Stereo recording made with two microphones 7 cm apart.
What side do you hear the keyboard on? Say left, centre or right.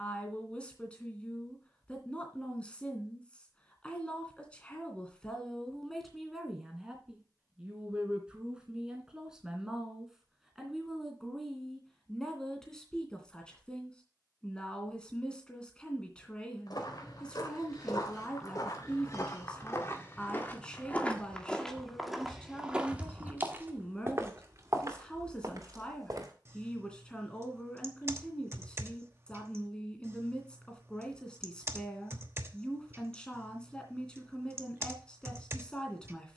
right.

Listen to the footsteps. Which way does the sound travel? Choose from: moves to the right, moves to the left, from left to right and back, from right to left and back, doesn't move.
moves to the right.